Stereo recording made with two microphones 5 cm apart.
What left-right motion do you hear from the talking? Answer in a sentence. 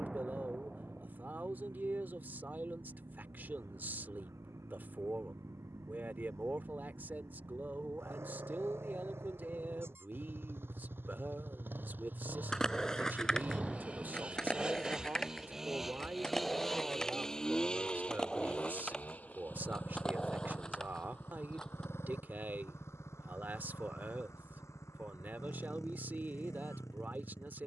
In this clip you hear the talking stay put.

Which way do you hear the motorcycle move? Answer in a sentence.
In this clip you hear the motorcycle move to the left.